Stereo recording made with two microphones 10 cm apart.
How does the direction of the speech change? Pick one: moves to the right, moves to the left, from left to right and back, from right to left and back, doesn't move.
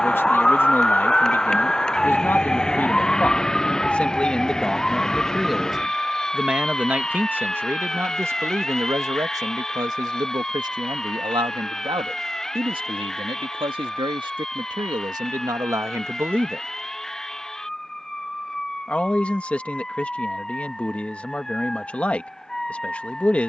from left to right and back.